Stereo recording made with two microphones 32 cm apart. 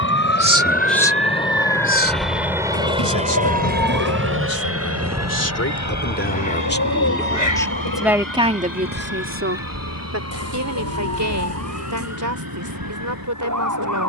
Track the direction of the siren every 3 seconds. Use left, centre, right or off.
left, centre, right, right, right.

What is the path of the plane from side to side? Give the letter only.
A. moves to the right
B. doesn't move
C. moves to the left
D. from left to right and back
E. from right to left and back
A.